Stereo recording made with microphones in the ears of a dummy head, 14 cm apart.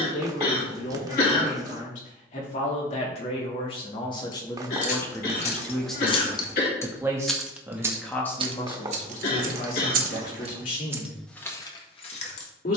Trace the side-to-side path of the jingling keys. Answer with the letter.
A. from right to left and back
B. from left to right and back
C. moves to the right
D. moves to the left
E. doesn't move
B.